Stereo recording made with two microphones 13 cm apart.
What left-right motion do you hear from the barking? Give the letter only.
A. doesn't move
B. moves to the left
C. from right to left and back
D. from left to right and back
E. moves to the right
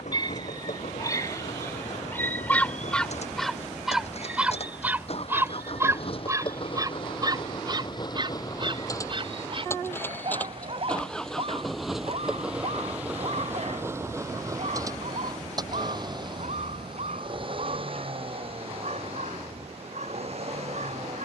E.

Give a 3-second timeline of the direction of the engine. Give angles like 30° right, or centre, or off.
60° left, 50° left, 40° left, 10° left, 20° right, 40° right, 50° right.